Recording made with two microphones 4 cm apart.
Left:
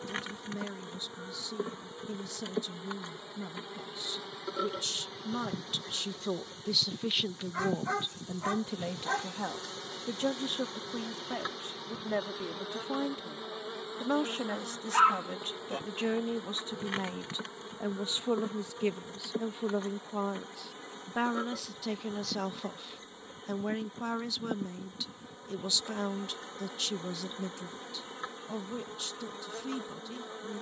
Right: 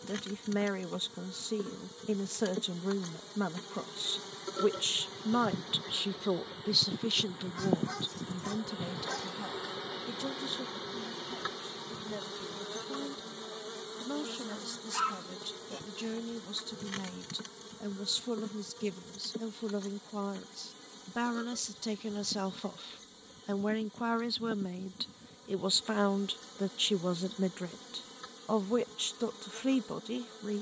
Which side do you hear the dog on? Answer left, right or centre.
left.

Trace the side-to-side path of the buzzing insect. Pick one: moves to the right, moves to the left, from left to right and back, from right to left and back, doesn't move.
from left to right and back.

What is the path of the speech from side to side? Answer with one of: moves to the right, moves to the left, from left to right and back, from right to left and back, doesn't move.
from right to left and back.